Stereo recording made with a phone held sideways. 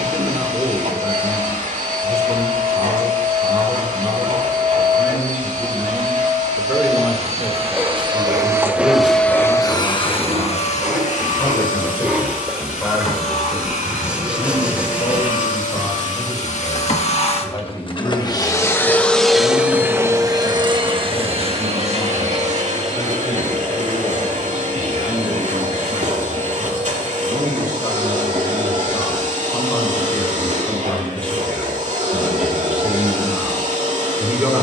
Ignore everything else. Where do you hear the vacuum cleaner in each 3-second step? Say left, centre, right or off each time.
right, right, right, left, left, left, centre, right, right, right, right, right.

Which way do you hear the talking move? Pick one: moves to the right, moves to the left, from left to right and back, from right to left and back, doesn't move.
from right to left and back.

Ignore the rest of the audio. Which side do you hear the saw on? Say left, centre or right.
centre.